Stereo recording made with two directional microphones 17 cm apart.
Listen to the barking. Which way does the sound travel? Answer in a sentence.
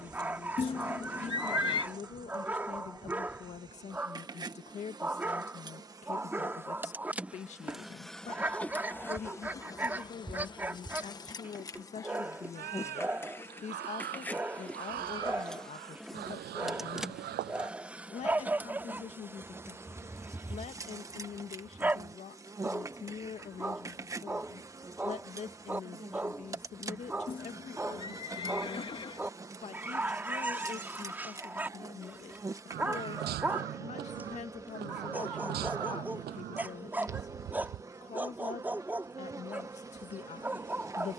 In this clip you hear the barking stay in one place.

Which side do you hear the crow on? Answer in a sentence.
In this clip you hear the crow on the right.